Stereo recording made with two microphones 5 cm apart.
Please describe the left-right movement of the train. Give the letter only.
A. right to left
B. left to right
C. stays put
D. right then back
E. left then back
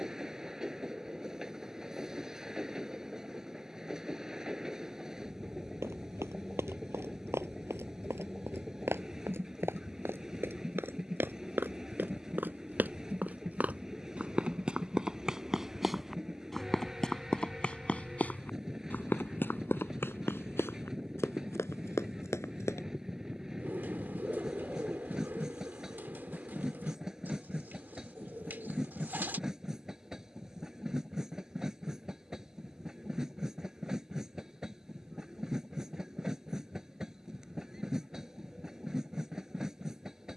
C.